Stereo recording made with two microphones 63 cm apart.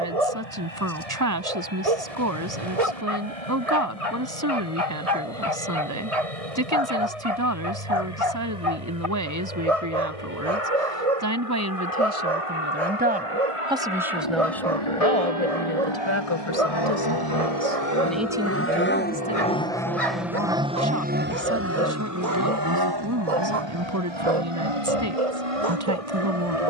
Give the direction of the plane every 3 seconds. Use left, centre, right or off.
left, left, left, left, left, left, centre, right, right.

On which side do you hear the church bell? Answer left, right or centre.
left.